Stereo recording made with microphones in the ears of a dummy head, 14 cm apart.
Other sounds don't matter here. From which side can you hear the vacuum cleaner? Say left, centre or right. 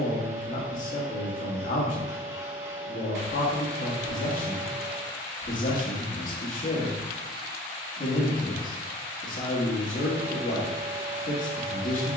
right.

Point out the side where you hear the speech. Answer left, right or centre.
left.